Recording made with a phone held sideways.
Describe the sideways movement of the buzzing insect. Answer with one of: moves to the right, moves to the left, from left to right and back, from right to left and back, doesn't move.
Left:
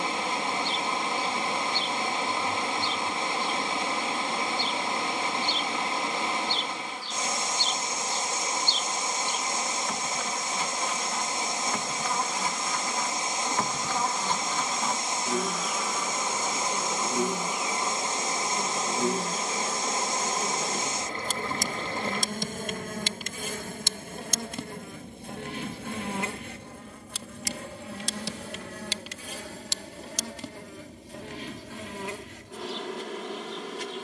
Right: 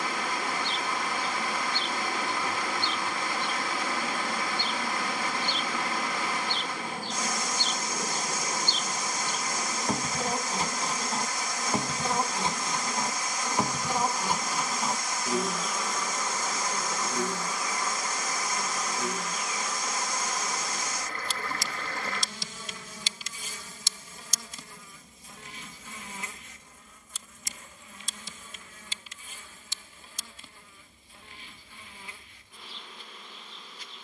moves to the left.